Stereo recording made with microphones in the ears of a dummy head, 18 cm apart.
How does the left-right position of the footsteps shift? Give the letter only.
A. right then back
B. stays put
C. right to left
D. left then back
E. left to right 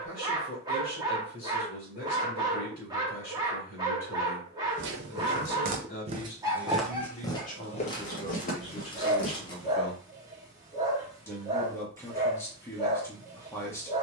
C.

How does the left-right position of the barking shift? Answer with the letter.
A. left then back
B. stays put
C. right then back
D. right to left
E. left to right
B.